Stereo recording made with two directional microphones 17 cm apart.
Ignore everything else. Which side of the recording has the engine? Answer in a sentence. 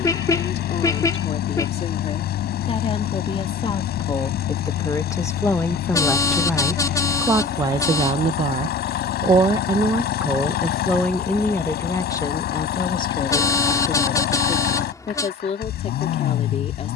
In this clip you hear the engine on the left.